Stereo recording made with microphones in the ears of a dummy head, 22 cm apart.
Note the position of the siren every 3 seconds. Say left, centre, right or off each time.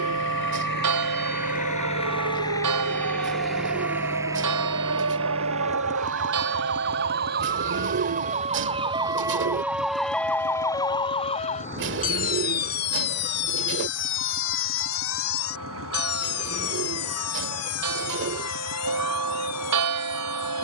right, right, right, centre, left, left, left.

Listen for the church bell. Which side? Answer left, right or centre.
right.